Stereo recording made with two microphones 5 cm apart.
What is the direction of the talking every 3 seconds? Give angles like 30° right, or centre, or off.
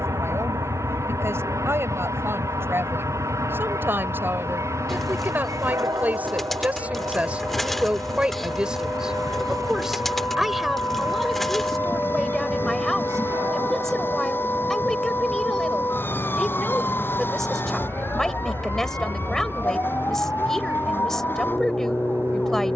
60° right, 40° right, 30° right, 10° right, 10° left, 10° left, 10° left, 10° left.